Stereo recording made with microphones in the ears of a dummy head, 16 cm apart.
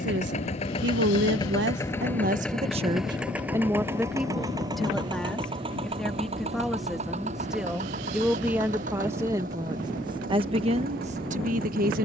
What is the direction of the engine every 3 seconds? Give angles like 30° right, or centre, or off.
20° left, 20° right, 40° right, 50° right.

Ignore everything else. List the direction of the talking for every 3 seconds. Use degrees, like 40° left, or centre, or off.
50° right, centre, centre, 30° right.